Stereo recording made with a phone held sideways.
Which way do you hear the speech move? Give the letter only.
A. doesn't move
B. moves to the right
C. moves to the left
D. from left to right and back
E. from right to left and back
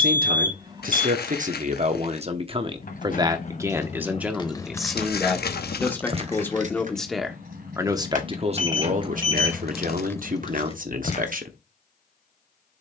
E.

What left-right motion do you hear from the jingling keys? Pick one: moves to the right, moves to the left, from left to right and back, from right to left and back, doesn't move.
from left to right and back.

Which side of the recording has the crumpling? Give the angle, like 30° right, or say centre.
70° left.